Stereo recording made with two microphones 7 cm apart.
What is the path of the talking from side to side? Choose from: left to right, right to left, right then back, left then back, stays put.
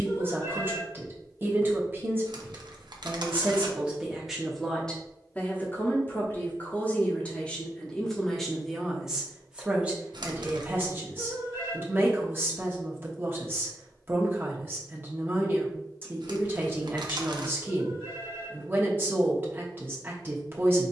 left then back.